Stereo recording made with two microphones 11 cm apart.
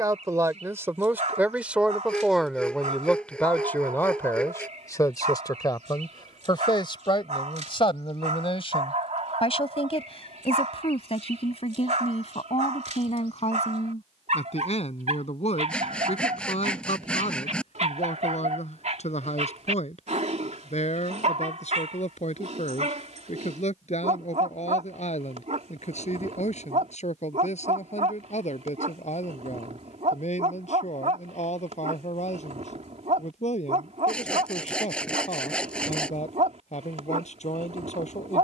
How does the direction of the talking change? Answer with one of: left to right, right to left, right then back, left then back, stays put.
right to left.